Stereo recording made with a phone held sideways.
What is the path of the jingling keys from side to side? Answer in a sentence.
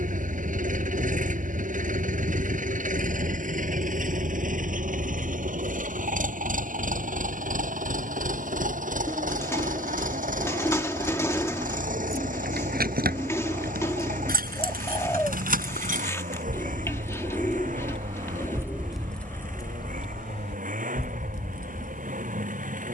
In this clip you hear the jingling keys go from the right side to the left.